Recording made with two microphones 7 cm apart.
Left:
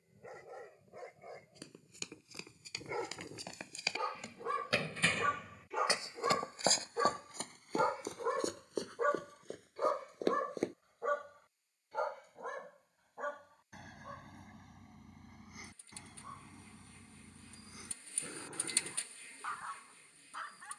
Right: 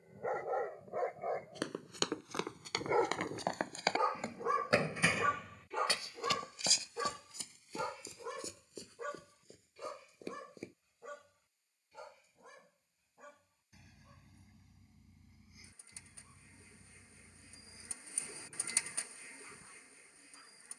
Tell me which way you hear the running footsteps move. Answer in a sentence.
In this clip you hear the running footsteps move to the left.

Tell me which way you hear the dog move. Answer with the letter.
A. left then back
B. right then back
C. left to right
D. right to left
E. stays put
D.